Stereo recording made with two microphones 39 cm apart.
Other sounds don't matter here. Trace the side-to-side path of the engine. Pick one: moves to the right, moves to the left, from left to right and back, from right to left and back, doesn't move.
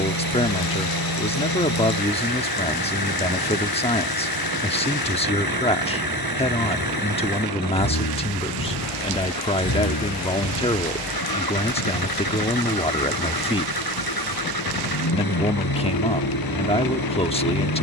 doesn't move.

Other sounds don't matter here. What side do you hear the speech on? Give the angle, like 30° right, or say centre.
20° left.